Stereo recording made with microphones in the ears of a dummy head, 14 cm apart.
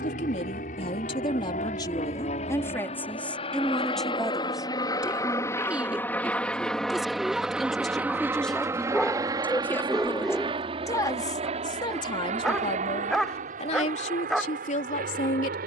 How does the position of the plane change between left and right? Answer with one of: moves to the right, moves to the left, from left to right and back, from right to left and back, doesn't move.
moves to the right.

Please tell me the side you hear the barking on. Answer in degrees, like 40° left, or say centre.
centre.